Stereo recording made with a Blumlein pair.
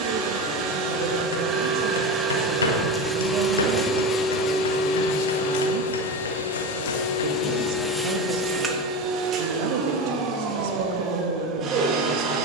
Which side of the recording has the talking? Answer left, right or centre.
right.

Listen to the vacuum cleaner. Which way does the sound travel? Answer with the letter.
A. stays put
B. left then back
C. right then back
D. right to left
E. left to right
B.